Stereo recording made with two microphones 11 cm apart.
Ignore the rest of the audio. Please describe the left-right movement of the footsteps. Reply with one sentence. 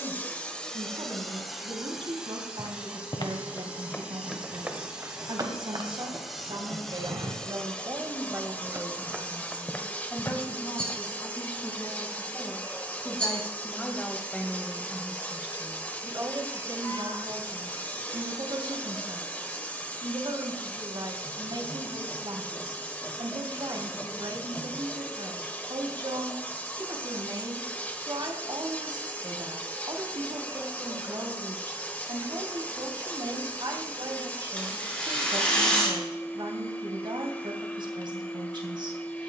You can hear the footsteps move from left to right and back again.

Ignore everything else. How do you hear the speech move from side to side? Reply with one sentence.
You can hear the speech go left and come back.